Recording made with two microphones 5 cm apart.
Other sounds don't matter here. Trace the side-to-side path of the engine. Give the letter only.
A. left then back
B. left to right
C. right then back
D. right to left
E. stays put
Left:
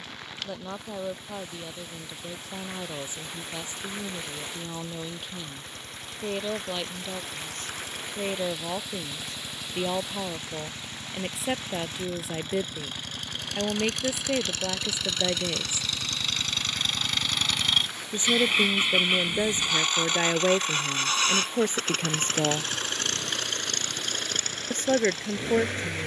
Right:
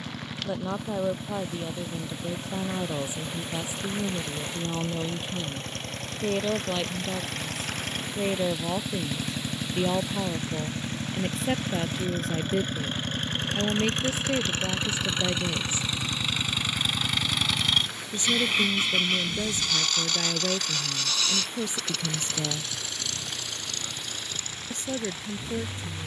D.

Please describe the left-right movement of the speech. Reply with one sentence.
You can hear the speech move to the left.